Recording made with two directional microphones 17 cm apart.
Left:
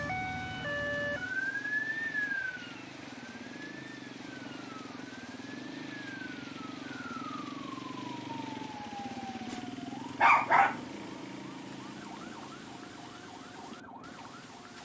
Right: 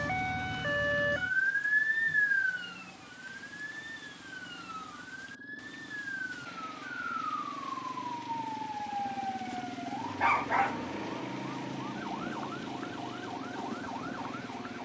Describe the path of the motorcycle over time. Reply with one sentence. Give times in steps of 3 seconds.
In this clip you hear the motorcycle on the left from 0 s, in the centre from 9 s and on the right from 12 s.